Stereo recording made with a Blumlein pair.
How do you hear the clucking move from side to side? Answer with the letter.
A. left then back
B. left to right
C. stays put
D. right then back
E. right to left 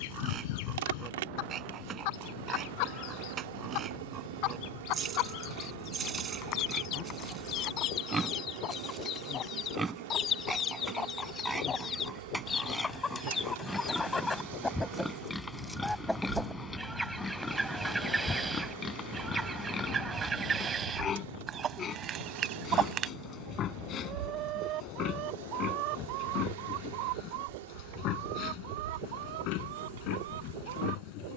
B.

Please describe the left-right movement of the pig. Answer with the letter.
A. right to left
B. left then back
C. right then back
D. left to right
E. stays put
A.